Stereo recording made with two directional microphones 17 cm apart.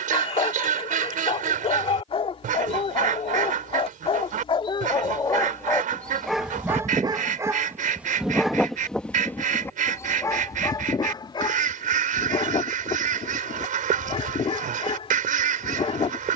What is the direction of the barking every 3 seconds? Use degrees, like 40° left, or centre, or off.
30° left, 30° left, 10° right, 20° left, 30° left, 30° left.